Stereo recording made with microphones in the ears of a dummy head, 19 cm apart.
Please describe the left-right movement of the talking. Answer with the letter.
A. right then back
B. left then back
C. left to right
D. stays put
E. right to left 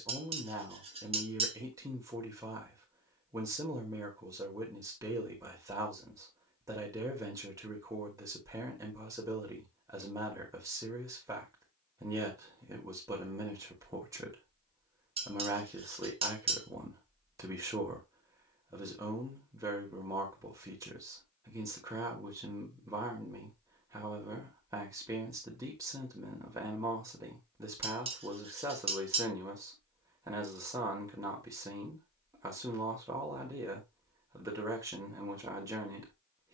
D.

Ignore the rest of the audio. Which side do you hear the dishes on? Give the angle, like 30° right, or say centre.
30° right.